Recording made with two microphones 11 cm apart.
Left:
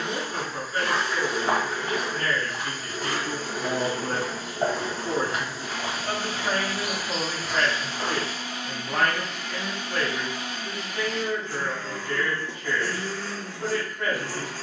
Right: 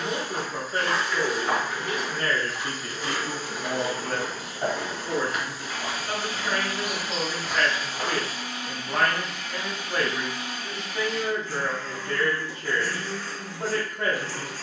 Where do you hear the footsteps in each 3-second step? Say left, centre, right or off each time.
left, left, centre, off, off.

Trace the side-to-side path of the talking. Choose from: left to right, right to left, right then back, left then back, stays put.
left then back.